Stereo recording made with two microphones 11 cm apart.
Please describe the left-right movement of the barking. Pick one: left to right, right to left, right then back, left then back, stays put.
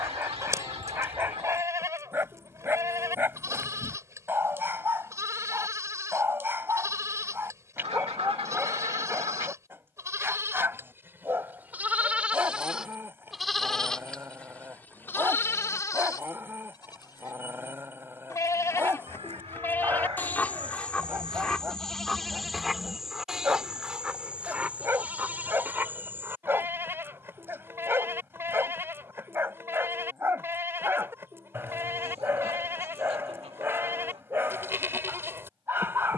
stays put.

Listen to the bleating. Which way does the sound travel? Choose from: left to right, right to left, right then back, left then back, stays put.
left then back.